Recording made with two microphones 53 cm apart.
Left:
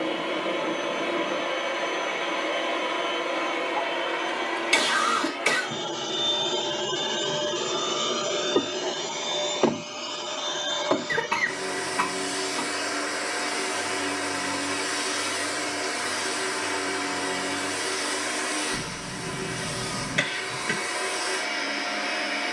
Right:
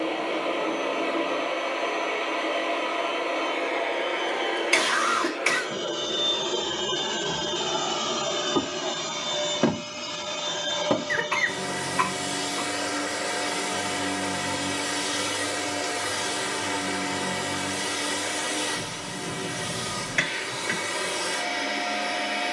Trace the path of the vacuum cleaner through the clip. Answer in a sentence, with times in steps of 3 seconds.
You can hear the vacuum cleaner on the left from 0 s, in the centre from 6 s and on the right from 9 s.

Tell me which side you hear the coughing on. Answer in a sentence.
In this clip you hear the coughing on the left.